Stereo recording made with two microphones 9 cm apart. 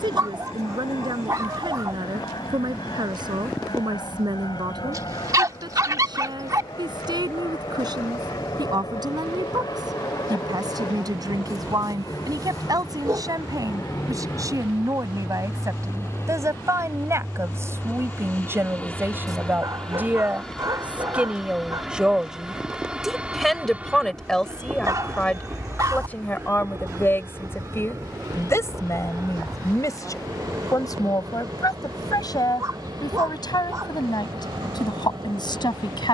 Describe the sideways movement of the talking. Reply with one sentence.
In this clip you hear the talking go from the right side to the left.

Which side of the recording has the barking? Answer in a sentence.
You can hear the barking on the right.